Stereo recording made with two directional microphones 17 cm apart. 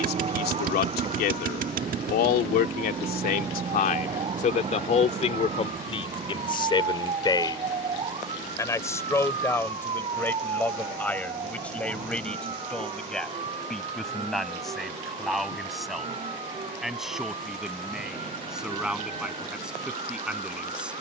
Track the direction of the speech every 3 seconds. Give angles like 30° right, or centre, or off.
70° left, 50° left, 20° left, 10° left, centre, centre, centre.